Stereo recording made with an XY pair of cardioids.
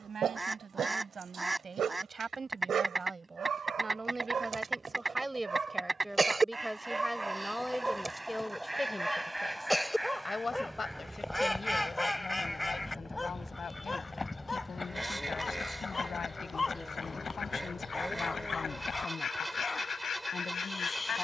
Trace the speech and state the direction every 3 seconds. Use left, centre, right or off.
right, right, centre, left, left, left, left.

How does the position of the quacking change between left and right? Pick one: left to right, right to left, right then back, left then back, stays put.
right to left.